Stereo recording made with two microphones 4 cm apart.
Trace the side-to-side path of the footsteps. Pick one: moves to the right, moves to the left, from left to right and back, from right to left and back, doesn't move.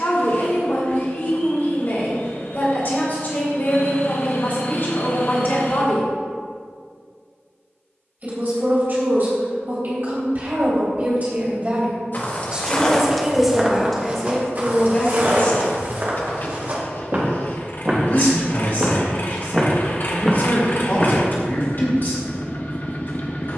from left to right and back.